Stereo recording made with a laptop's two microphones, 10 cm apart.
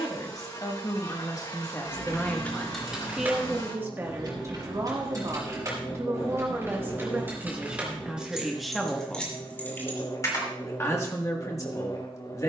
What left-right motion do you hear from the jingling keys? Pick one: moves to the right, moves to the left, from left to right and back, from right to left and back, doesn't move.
from left to right and back.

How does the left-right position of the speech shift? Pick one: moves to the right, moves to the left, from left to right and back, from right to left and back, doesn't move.
from left to right and back.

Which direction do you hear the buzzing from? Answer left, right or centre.
left.